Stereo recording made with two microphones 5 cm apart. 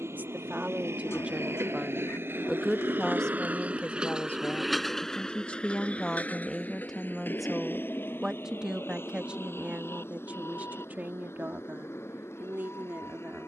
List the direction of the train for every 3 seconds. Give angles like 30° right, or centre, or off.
60° right, 10° right, 50° left, 60° left, 70° left.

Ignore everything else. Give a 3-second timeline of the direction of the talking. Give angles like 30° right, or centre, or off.
20° right, 30° left, centre, 40° right, 50° right.